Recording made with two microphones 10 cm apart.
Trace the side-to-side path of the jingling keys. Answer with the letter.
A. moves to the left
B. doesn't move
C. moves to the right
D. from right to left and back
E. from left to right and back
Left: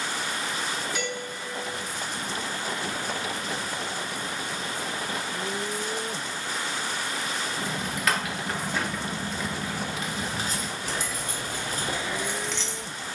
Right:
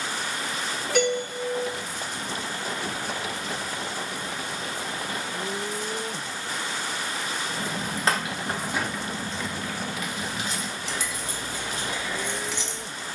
D.